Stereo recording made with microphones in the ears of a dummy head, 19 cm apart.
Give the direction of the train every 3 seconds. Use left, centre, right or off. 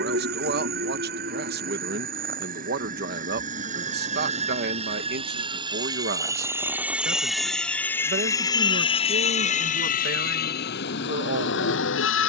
right, right, centre, left.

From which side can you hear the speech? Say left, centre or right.
right.